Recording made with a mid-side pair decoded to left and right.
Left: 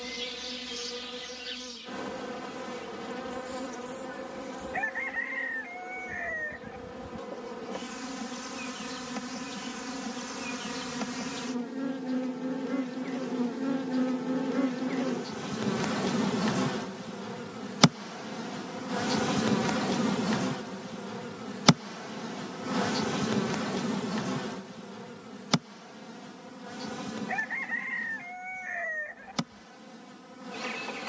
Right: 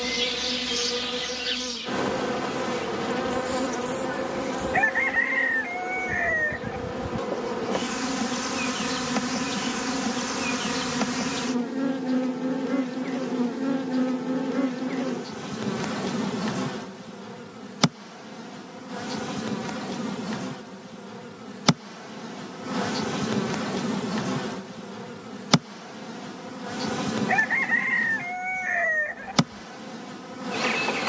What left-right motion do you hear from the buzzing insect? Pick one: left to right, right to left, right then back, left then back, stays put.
left then back.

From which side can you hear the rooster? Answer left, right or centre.
right.